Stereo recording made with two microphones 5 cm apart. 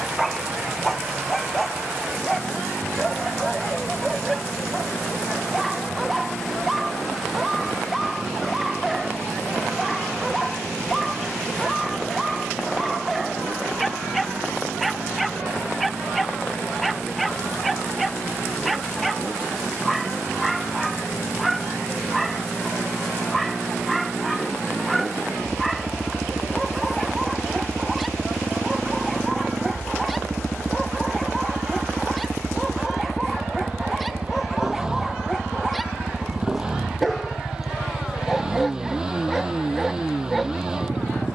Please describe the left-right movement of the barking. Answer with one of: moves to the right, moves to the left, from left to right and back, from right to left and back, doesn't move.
doesn't move.